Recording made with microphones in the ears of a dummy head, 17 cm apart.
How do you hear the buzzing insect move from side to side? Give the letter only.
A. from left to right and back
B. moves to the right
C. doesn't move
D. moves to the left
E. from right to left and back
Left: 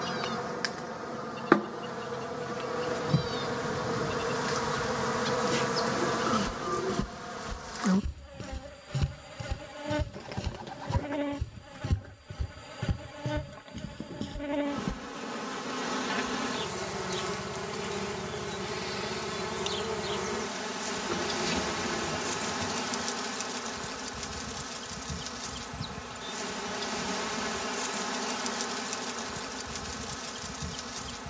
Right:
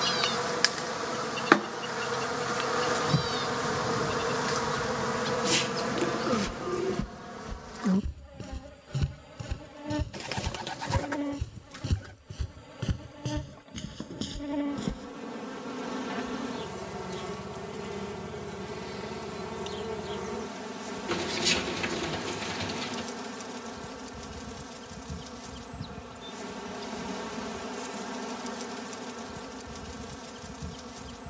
D.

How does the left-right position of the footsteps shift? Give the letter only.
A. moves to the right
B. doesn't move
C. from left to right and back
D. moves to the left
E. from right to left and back
A.